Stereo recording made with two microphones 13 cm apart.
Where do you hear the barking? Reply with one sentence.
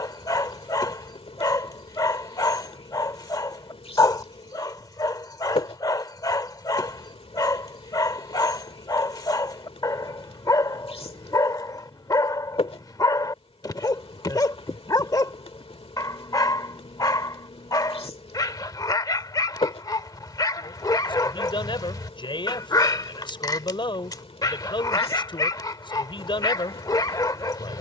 In this clip you hear the barking on the left.